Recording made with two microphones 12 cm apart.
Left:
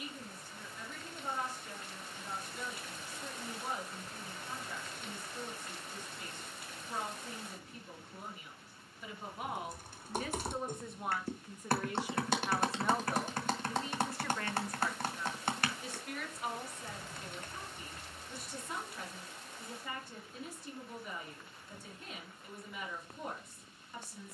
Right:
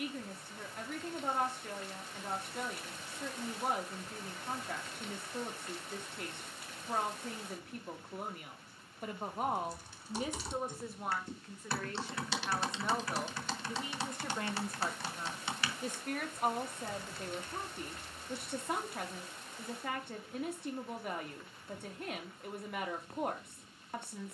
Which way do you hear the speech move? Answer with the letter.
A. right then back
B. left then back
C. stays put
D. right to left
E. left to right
B.